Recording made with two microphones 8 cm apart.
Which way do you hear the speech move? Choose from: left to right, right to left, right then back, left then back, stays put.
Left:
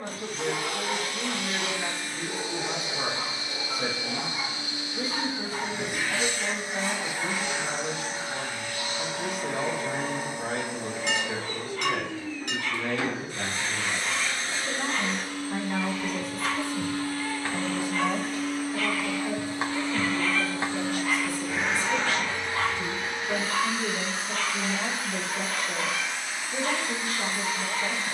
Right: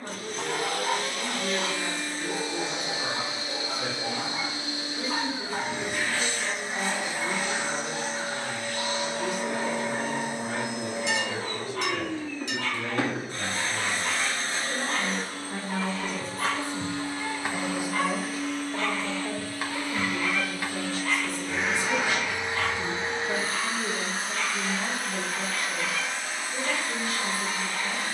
right then back.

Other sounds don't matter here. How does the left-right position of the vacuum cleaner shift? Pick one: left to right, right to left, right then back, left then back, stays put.
left then back.